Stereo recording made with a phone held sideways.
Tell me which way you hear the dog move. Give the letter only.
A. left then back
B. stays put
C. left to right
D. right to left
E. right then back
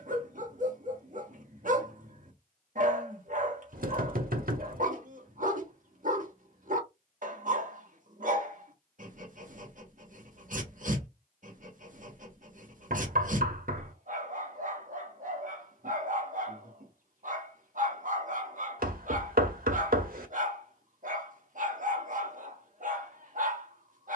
B.